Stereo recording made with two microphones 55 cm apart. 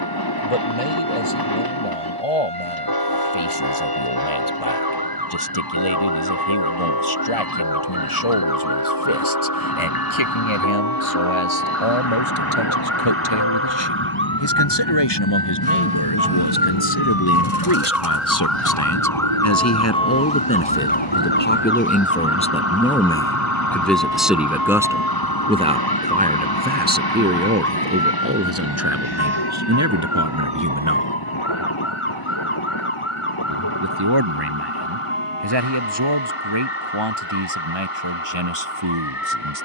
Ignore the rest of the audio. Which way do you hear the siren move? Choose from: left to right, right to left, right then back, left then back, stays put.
right to left.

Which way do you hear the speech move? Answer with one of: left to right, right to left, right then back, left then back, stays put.
left to right.